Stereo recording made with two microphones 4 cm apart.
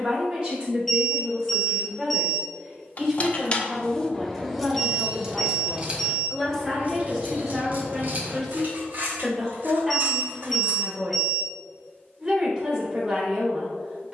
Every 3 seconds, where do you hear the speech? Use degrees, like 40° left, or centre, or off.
20° right, centre, centre, 10° right, 20° right.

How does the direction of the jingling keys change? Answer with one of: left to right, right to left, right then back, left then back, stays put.
left to right.